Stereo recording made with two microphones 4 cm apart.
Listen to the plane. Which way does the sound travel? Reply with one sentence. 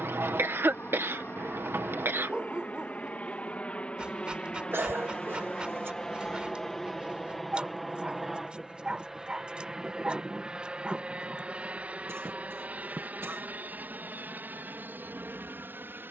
You can hear the plane move to the right.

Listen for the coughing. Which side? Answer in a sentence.
You can hear the coughing on the right.